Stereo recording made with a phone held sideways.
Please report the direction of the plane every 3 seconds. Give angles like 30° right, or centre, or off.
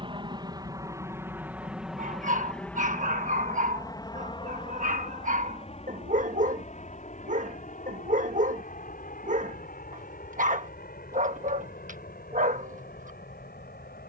10° right, 30° left, 50° left, 60° left, 60° left.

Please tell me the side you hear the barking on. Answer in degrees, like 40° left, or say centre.
50° right.